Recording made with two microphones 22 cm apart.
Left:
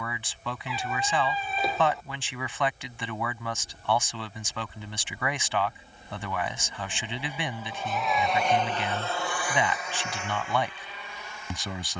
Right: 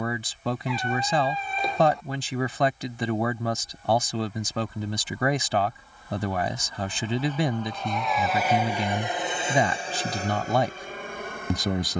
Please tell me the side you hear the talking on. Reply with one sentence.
You can hear the talking on the right.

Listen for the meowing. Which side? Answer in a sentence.
You can hear the meowing in the centre.